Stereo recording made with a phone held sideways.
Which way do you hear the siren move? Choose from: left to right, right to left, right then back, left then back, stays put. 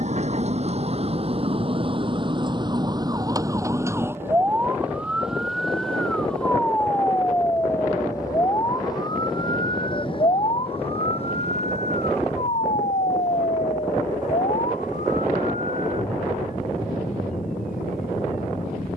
right to left.